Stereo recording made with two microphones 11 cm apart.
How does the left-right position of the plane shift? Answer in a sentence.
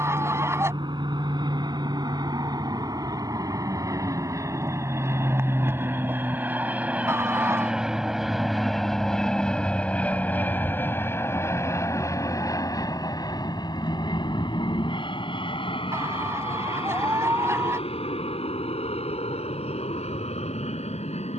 In this clip you hear the plane travel towards the left.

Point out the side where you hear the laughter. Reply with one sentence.
In this clip you hear the laughter on the right.